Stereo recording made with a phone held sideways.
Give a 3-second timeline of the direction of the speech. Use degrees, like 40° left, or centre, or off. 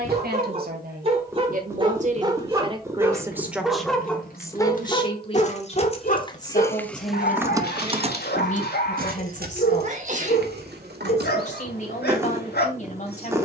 50° right, 20° left, 50° left, 50° left, 50° left.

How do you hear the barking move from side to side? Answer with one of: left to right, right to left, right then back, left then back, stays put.
right to left.